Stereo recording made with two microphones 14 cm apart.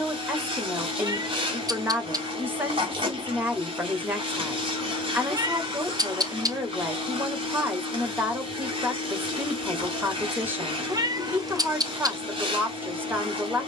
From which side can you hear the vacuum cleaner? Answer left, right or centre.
right.